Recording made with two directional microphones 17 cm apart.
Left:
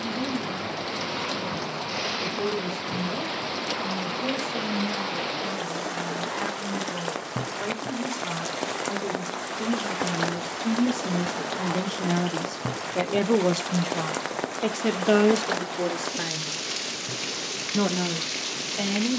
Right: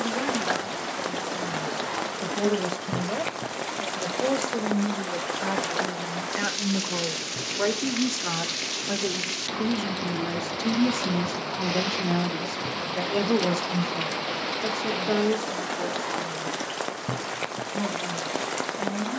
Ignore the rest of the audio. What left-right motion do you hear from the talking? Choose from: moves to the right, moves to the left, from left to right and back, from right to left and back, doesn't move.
moves to the left.